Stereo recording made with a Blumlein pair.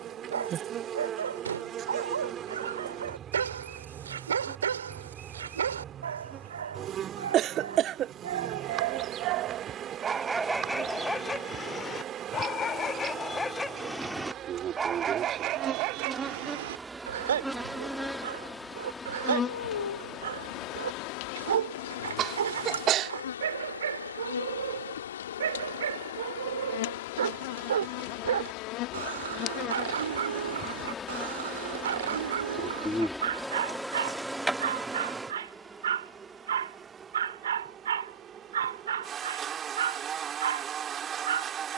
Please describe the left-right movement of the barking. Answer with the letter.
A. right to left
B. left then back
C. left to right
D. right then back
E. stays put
B.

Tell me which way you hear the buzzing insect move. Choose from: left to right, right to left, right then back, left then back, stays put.
left then back.